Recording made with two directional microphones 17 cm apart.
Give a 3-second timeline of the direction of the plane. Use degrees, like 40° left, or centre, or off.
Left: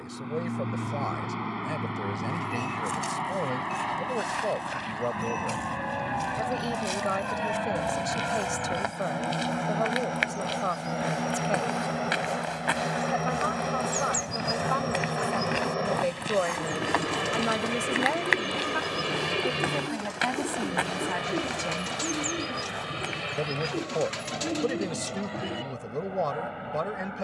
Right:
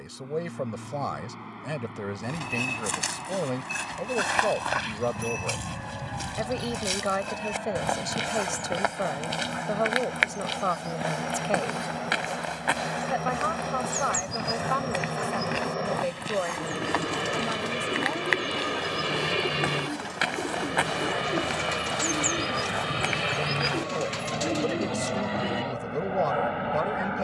50° left, 40° left, 40° left, 30° left, 20° left, centre, 10° right, 30° right, 40° right.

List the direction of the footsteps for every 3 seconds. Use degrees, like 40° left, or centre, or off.
60° right, 50° right, 40° right, 20° right, 10° right, 10° left, centre, 30° right, off.